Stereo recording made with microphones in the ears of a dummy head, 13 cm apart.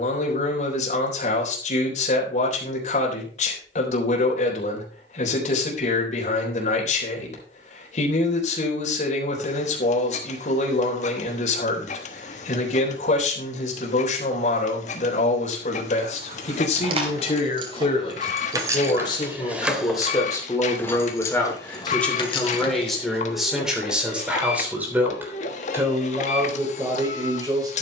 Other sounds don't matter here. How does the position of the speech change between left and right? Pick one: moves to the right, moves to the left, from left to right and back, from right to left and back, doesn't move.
moves to the right.